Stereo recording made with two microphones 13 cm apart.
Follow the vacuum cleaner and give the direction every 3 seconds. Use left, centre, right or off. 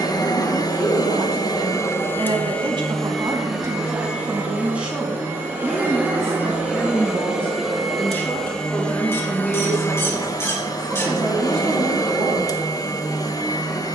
left, centre, centre, left, left.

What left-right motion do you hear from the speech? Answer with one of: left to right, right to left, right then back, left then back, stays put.
left then back.